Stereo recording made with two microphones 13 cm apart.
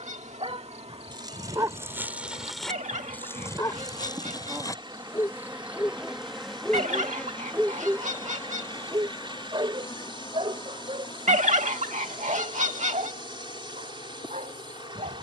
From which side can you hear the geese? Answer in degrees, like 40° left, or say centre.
70° right.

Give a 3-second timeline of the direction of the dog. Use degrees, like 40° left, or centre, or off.
20° right, 20° left, 10° right, 40° right, 60° right.